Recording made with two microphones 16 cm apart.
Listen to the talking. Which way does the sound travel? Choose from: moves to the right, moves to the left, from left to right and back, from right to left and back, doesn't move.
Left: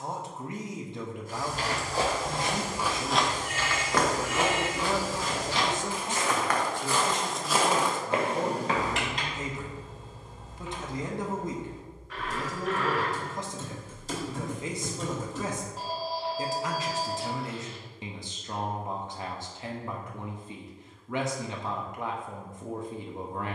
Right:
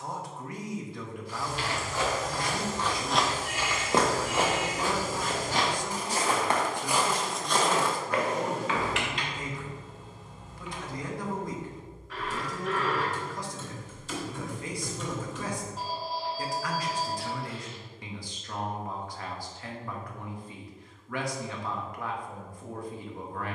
doesn't move.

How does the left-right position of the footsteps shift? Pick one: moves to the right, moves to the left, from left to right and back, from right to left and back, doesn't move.
from left to right and back.